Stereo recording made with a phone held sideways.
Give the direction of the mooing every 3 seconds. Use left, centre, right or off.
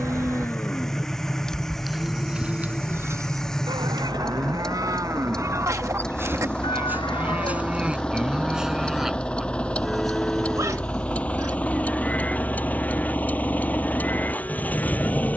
centre, right, centre, centre, centre.